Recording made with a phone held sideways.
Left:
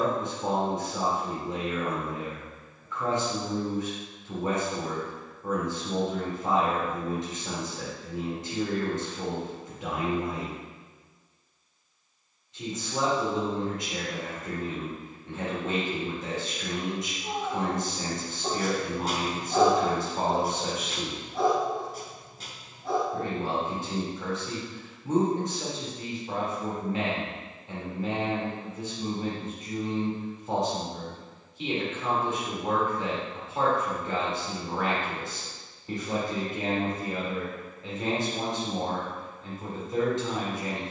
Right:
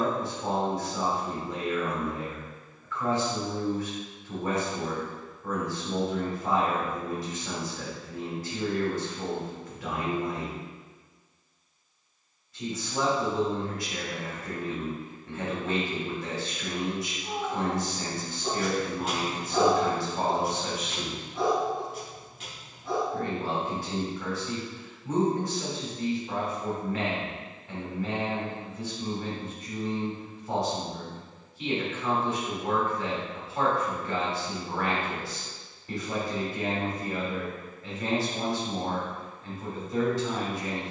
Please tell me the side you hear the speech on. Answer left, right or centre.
left.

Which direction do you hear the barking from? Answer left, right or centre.
left.